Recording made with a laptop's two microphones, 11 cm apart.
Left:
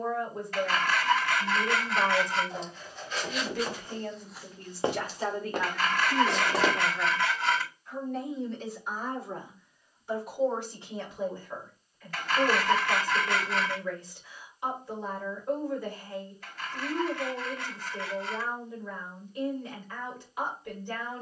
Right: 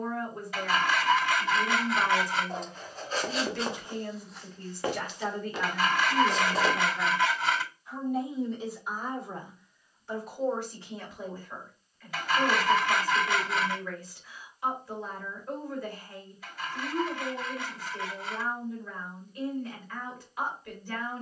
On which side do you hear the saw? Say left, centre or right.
centre.